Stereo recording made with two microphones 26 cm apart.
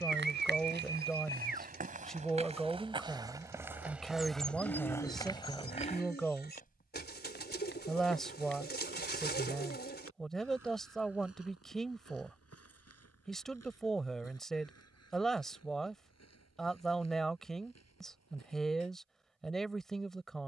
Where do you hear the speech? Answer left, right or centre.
centre.